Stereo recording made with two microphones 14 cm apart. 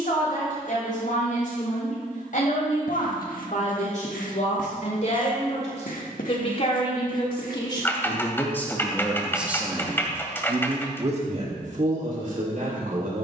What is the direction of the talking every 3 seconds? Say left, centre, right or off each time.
left, left, left, right, right.